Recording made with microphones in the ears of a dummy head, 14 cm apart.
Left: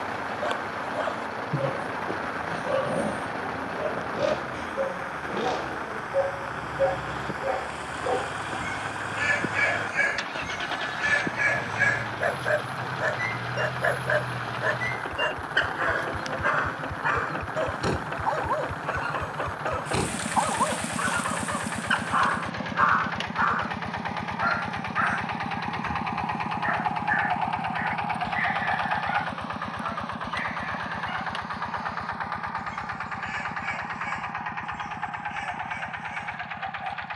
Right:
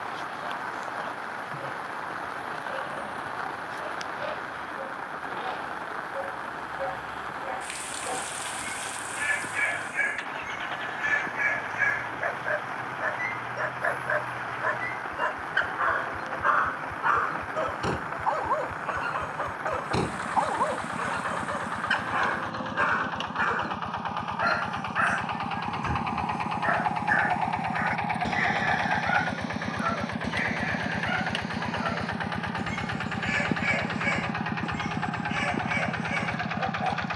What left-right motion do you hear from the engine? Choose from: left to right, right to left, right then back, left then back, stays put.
left to right.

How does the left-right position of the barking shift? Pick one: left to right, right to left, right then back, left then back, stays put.
left to right.